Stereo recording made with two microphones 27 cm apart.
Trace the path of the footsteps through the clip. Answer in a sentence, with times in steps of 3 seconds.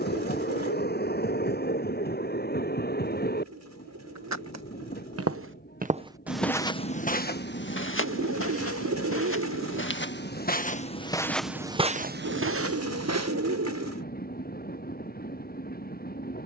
You can hear the footsteps not at all from 0 s, on the right from 3 s, on the left from 6 s, on the right from 12 s and not at all from 15 s.